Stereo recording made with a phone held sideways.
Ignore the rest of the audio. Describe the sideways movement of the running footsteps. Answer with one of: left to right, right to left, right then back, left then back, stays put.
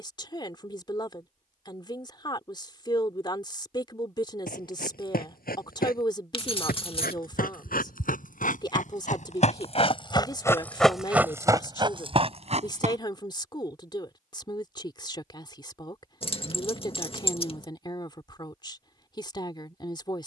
left to right.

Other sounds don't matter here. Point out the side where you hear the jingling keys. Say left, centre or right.
left.